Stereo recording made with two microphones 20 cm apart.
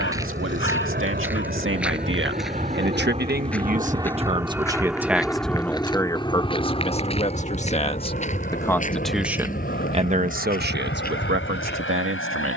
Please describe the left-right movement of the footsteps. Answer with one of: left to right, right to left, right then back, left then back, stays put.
right to left.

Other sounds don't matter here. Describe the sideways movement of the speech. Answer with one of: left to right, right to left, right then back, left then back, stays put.
left then back.